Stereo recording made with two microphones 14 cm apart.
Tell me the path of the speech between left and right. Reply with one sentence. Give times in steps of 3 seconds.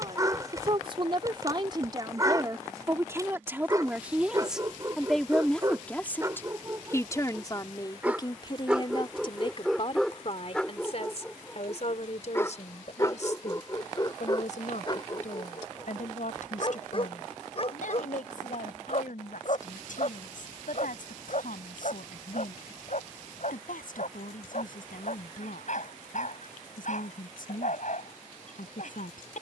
You can hear the speech on the right from 0 s, in the centre from 3 s and on the left from 6 s.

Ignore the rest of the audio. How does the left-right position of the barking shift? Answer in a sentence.
In this clip you hear the barking travel towards the left.